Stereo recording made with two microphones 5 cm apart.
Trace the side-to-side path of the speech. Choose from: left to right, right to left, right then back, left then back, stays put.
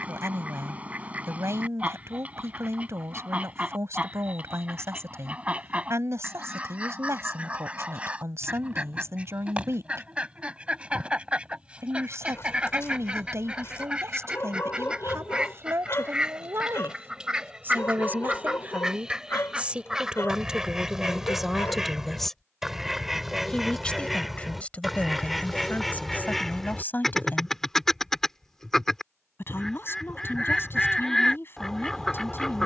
right to left.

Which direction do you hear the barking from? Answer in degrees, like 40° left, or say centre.
50° left.